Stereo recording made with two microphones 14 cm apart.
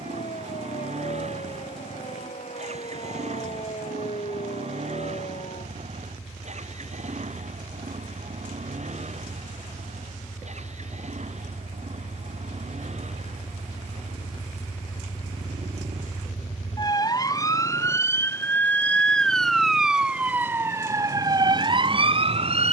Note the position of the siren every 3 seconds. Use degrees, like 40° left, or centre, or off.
60° left, 60° left, 60° left, 50° left, 50° left, 30° left, centre, 40° right.